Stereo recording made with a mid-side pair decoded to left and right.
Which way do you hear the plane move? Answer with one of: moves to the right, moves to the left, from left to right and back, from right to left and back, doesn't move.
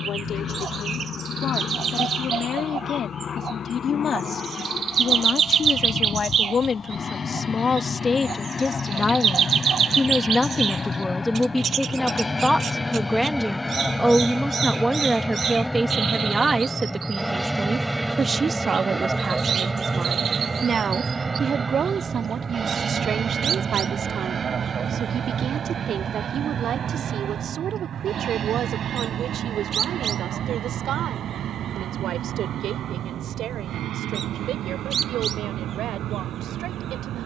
moves to the right.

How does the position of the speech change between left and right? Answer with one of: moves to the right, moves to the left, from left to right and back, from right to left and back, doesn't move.
moves to the right.